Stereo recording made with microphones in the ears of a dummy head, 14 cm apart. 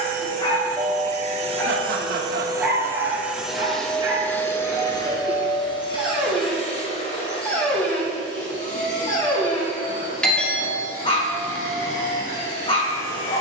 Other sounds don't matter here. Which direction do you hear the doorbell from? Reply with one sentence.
In this clip you hear the doorbell in the centre.